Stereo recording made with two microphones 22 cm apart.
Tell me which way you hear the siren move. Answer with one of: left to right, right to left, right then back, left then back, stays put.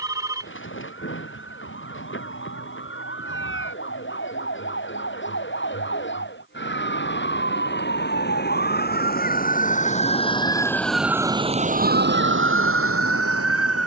left to right.